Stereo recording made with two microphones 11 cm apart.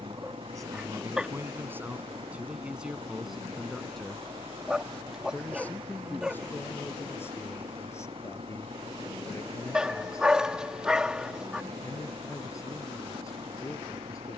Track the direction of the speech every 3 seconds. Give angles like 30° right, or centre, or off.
20° right, centre, 20° left, 30° left, 30° left.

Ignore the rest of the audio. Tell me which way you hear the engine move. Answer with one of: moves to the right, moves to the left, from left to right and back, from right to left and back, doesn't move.
doesn't move.